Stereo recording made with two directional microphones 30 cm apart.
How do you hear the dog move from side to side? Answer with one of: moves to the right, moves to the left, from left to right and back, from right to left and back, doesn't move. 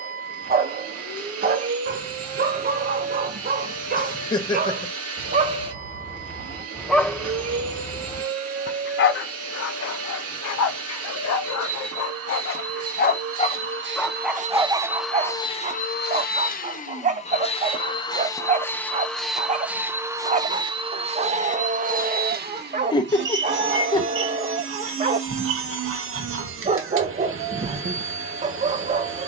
from right to left and back.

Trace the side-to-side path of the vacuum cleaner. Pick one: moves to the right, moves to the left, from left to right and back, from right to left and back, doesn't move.
from right to left and back.